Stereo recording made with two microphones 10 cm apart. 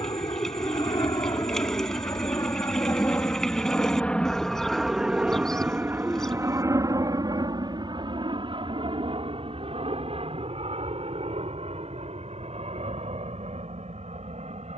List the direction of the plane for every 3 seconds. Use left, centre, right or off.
left, centre, right, right, right.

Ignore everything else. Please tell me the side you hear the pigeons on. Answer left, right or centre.
centre.